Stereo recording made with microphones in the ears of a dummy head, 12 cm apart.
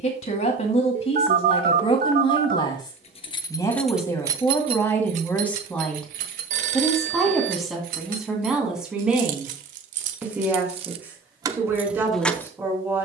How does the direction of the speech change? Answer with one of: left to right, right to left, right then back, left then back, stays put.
left to right.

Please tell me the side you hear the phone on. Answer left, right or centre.
right.